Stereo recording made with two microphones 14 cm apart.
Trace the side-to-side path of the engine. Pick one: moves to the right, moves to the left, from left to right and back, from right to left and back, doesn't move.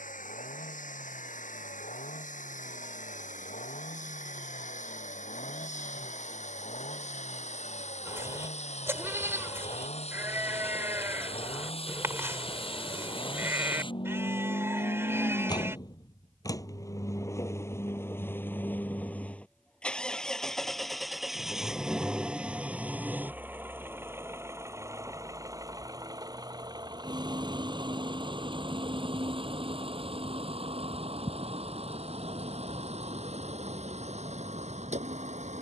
moves to the right.